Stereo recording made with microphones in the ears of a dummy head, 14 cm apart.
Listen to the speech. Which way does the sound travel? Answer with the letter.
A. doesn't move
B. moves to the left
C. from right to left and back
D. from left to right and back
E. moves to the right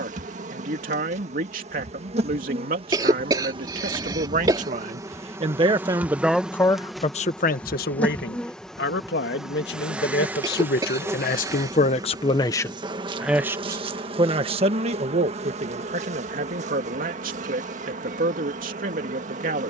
C.